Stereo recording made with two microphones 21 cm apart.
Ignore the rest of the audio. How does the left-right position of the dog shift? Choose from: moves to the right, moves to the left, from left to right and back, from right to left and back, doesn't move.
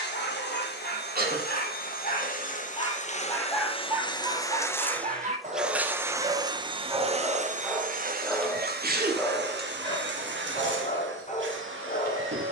from left to right and back.